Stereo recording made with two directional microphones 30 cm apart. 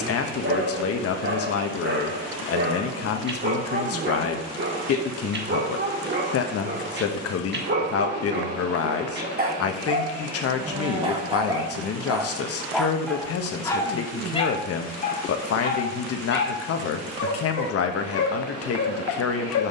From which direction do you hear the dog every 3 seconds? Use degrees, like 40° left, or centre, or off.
40° right, 40° right, 40° right, 20° right, 10° left, 40° left, 60° left.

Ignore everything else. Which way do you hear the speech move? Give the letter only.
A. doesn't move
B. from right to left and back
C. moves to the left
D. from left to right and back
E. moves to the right
A.